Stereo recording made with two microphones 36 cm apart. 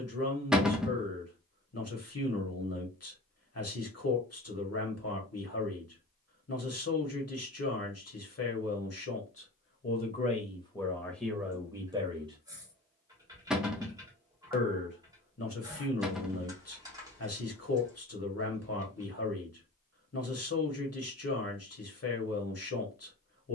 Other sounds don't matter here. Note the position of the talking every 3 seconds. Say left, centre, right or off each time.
left, left, left, centre, centre, left, left, left.